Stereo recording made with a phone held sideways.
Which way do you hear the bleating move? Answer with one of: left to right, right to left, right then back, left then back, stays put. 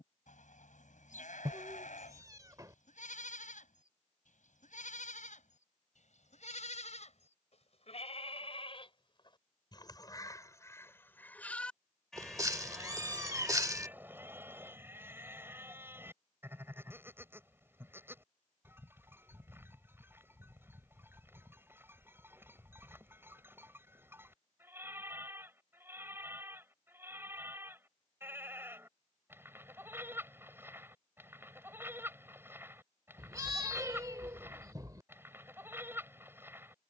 left to right.